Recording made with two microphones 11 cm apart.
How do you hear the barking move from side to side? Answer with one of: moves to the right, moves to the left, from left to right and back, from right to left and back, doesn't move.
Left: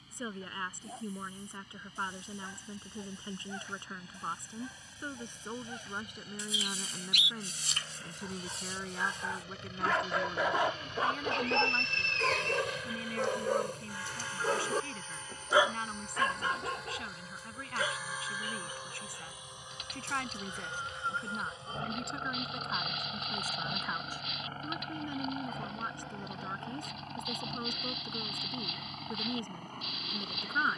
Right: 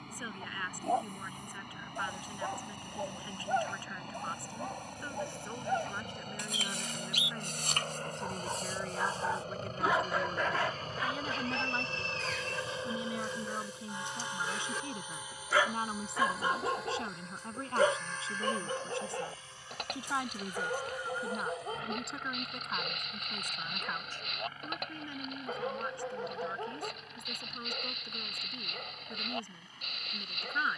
from right to left and back.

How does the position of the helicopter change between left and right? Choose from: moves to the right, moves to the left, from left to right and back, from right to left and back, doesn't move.
moves to the left.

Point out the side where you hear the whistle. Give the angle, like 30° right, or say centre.
70° left.